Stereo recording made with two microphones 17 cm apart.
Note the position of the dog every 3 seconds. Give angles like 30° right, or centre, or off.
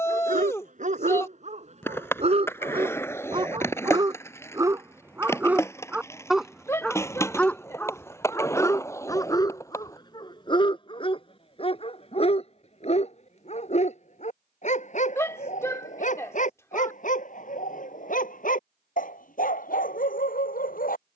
40° right, 20° right, 10° left, 30° left, 40° left, 50° left, 60° left.